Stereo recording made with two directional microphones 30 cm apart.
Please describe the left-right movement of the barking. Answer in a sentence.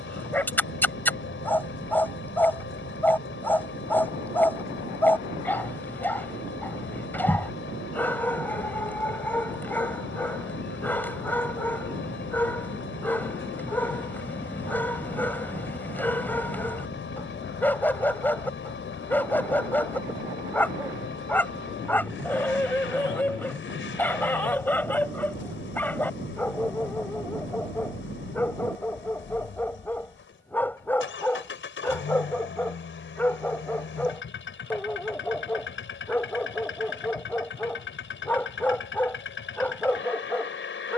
You can hear the barking stay in one place.